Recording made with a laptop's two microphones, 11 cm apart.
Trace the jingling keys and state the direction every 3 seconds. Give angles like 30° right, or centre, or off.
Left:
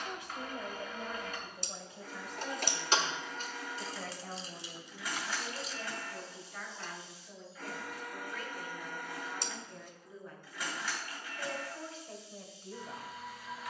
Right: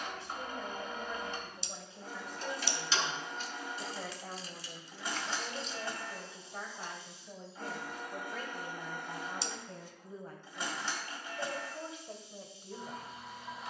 70° left, 30° left, 10° right, off, off.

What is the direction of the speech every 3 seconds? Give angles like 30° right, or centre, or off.
10° left, 20° right, 30° right, 40° right, 10° right.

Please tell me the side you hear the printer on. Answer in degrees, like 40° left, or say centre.
30° right.